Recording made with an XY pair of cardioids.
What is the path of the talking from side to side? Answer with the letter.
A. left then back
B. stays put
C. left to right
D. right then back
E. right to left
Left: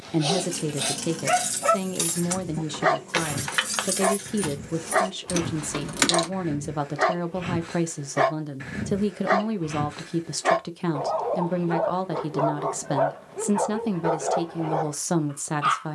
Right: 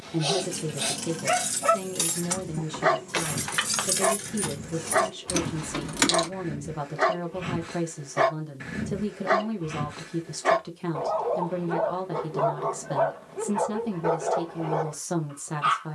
B.